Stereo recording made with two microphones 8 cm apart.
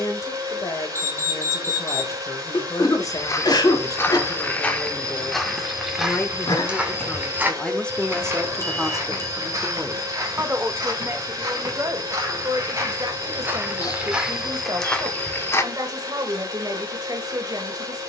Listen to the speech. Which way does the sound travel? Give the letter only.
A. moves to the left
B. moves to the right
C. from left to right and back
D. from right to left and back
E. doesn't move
B.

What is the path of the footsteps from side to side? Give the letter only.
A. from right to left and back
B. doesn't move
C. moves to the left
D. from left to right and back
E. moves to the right
D.